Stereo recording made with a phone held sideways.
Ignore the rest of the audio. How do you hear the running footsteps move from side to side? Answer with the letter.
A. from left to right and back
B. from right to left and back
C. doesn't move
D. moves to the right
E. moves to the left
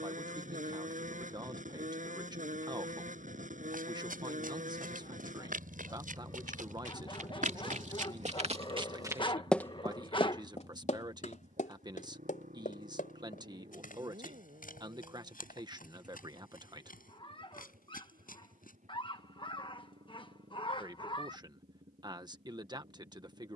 E.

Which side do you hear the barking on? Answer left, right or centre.
left.